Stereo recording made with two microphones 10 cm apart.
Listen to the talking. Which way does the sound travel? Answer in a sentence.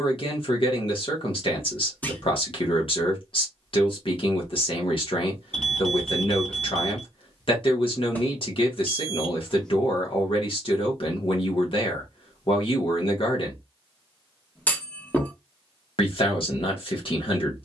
You can hear the talking stay put.